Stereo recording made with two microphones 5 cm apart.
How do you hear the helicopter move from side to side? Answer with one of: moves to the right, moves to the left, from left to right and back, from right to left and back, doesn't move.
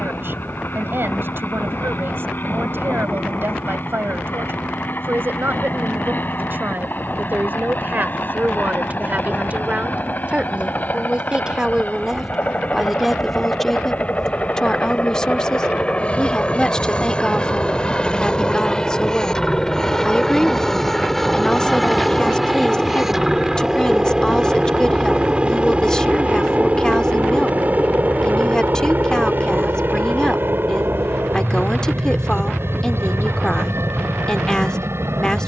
moves to the right.